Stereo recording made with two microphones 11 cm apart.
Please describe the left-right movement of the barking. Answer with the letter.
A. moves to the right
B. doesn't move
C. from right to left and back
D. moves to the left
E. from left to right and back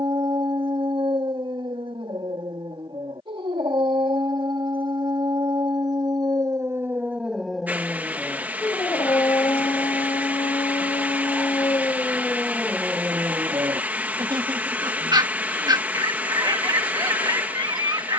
C.